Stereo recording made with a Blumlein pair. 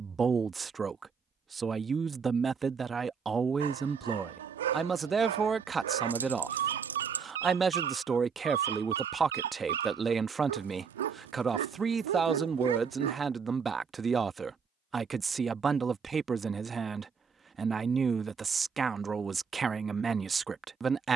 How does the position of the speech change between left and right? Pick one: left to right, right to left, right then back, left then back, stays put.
stays put.